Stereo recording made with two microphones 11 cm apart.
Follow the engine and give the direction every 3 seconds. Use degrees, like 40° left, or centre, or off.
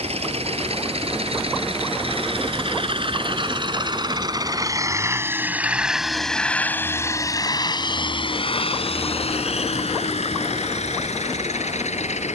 60° right, 30° right, 30° left, 70° left.